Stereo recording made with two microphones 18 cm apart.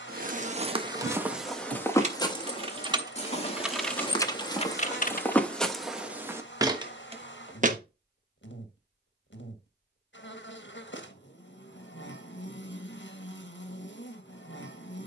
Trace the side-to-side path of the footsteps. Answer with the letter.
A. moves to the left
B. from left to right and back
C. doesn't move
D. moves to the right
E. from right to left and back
E.